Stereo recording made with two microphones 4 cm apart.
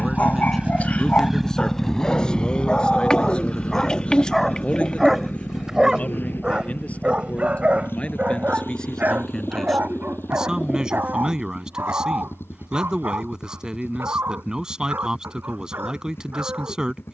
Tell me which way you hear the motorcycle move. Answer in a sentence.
You can hear the motorcycle move to the left.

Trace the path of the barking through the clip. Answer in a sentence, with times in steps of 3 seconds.
You can hear the barking on the left from 0 s, in the centre from 3 s and on the right from 6 s.